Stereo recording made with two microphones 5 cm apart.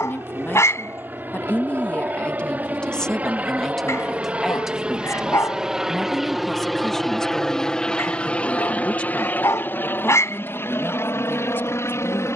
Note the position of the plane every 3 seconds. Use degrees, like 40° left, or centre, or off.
40° right, 20° right, 10° left, 50° left.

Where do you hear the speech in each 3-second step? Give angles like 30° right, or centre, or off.
40° left, centre, 10° left, 40° left.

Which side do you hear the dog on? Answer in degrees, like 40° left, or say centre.
80° left.